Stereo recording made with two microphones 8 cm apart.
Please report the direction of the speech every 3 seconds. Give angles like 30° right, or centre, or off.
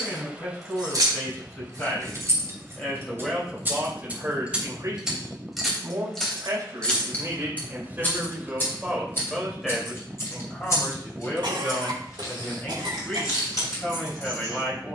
30° left, 30° right, 30° right, 10° left, 20° left.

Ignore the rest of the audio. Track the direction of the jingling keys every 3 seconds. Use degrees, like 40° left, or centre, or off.
50° right, 20° right, 20° left, 40° left, 50° left.